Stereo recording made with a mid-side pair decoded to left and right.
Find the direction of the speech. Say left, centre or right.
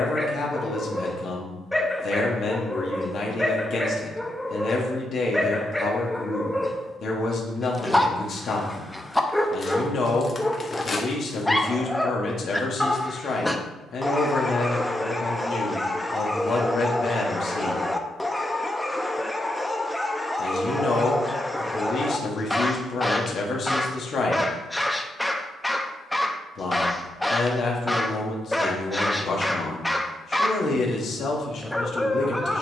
left.